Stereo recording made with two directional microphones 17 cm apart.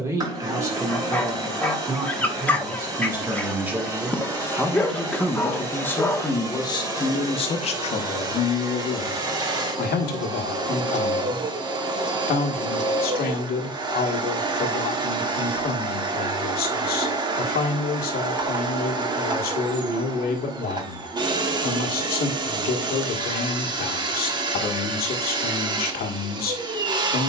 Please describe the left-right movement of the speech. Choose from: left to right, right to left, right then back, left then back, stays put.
right to left.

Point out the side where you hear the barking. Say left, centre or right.
centre.